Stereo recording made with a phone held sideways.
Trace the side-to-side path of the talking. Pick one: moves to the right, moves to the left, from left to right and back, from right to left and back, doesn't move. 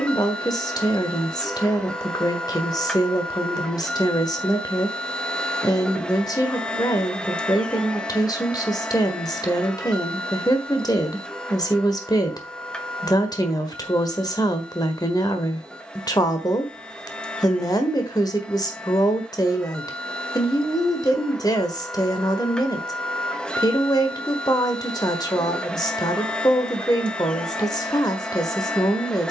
doesn't move.